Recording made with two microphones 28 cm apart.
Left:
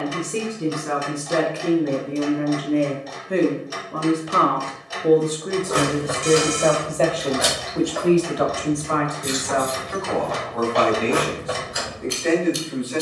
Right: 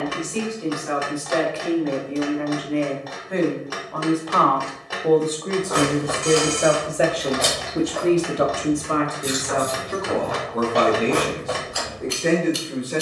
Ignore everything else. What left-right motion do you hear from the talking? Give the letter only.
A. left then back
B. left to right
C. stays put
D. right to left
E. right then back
B.